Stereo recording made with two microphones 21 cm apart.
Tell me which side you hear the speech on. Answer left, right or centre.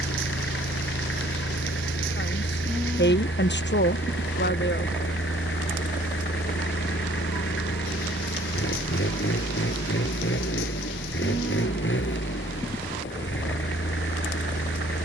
left.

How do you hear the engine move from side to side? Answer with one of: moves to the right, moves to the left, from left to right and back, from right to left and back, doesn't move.
doesn't move.